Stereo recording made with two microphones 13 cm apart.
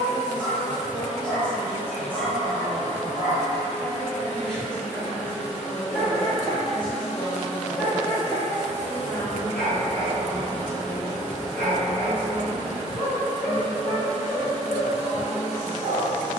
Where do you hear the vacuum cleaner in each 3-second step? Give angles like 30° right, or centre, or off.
40° left, 20° left, 10° right, 30° right, 30° right, 30° right.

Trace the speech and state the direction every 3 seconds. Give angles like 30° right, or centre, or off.
30° left, 30° left, 20° left, 30° right, 40° right, 40° right.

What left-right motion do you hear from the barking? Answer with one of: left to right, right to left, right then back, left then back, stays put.
stays put.